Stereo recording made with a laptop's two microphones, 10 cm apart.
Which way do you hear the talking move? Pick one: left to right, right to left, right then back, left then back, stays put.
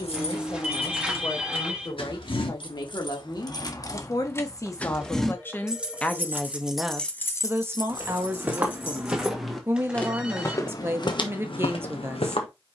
left to right.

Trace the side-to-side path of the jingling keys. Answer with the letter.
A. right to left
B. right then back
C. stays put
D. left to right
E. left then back
B.